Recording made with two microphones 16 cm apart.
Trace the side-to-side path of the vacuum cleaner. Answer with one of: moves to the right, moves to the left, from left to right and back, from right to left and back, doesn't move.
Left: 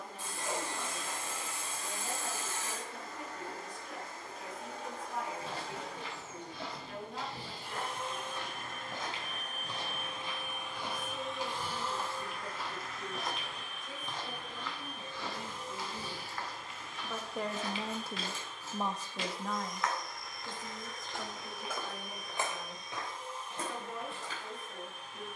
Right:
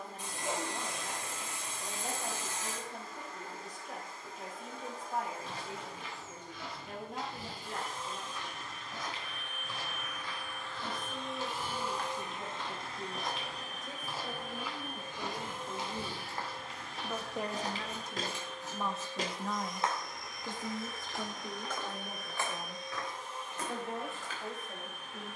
moves to the right.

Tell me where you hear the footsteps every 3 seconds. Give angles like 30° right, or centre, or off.
off, 40° left, 30° left, 20° left, centre, 30° right, 30° right, 20° left, 40° left.